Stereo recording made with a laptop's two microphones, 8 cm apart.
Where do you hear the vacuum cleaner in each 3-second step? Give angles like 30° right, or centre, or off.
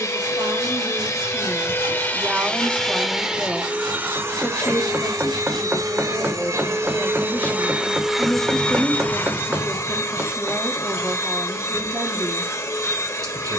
30° left, 30° right, 20° right, 40° left, 40° left.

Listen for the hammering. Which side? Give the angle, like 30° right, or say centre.
30° right.